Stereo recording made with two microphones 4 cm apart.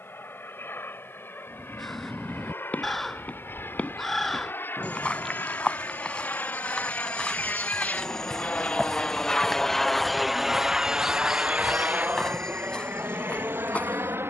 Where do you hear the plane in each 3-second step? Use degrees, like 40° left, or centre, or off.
70° left, 70° left, 50° left, 10° right, 50° right.